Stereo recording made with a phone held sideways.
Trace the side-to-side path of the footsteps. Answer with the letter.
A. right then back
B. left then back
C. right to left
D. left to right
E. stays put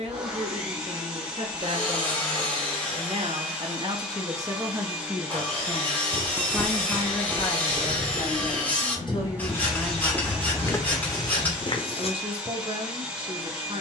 A.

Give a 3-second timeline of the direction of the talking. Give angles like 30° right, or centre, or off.
40° right, 20° right, 30° left, centre, 40° right.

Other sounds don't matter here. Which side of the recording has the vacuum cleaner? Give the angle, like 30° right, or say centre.
10° right.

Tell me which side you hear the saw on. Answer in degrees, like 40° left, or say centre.
10° left.